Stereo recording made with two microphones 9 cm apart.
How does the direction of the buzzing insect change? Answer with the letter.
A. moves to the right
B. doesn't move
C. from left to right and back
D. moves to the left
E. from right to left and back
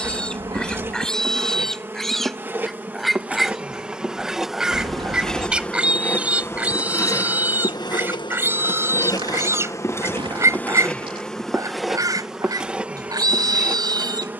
E.